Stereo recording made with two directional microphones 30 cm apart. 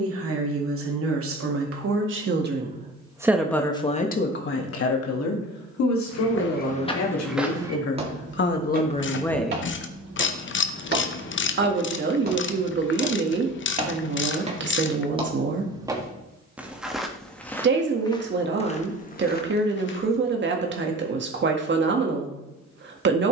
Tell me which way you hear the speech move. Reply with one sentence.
In this clip you hear the speech go left and come back.